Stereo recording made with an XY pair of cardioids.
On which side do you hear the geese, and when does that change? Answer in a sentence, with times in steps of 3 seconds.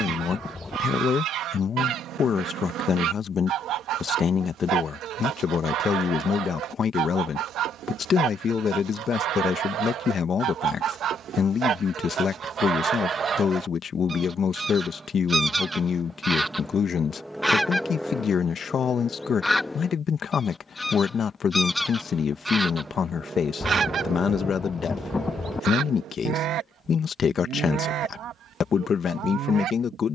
You can hear the geese on the right from 0 s, in the centre from 15 s and on the right from 24 s.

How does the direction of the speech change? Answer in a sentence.
You can hear the speech stay in one place.